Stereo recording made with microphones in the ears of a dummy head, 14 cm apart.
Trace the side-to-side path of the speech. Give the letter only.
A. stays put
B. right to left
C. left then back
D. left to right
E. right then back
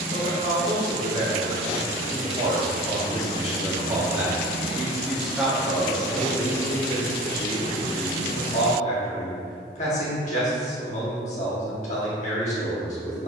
B.